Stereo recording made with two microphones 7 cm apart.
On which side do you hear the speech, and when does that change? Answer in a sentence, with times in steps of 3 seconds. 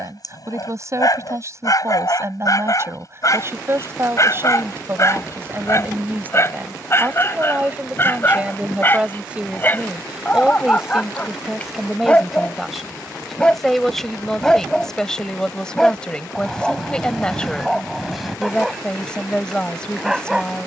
In this clip you hear the speech on the right from 0 s and in the centre from 9 s.